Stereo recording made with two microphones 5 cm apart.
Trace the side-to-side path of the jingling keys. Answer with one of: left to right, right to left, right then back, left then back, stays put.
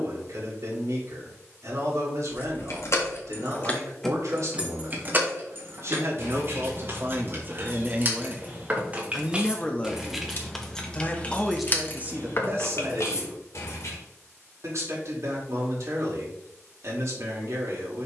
right then back.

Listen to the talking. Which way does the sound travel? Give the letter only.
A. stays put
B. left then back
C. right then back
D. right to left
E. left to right
B.